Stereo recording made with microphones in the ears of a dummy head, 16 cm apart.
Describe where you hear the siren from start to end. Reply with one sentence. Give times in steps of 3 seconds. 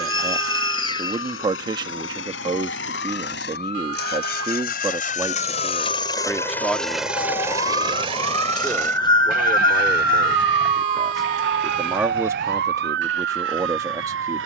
In this clip you hear the siren on the left from 0 s and on the right from 9 s.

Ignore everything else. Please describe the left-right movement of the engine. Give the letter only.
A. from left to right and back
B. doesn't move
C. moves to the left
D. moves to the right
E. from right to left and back
D.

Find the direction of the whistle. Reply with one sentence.
You can hear the whistle on the left.